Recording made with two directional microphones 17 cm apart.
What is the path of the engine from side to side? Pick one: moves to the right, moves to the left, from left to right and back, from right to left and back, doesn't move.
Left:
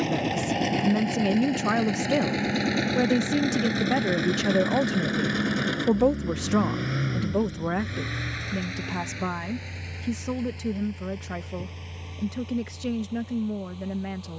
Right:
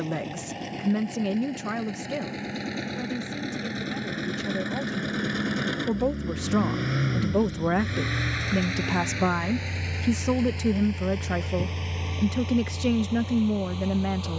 moves to the right.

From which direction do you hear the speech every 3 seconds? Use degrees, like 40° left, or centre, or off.
20° left, 50° left, 10° right, 30° right, 30° right.